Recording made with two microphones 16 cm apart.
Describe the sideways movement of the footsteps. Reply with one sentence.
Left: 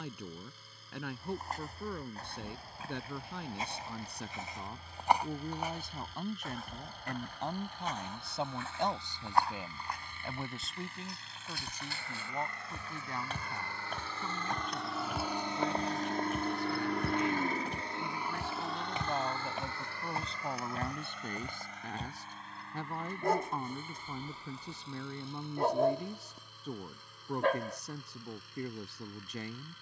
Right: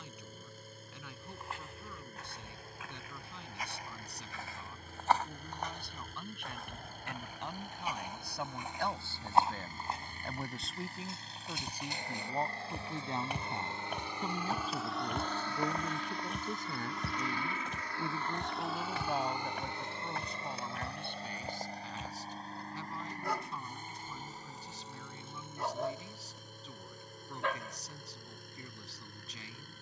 In this clip you hear the footsteps move from left to right and back again.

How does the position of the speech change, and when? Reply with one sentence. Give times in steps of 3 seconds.
You can hear the speech on the left from 0 s, in the centre from 9 s, on the right from 12 s, in the centre from 18 s and on the left from 21 s.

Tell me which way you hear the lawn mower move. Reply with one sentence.
You can hear the lawn mower move from right to left and back again.